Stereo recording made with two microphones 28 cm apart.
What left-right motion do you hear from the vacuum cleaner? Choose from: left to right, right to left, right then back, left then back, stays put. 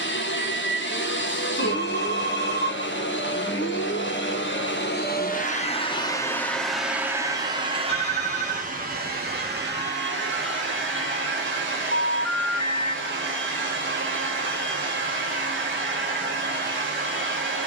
left to right.